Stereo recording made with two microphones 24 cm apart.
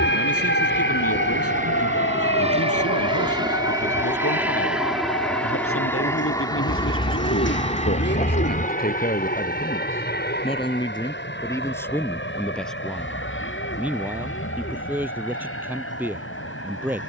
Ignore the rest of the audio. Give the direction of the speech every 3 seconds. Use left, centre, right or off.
left, left, left, left, centre, centre.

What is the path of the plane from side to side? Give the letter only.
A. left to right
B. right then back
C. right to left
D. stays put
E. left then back
C.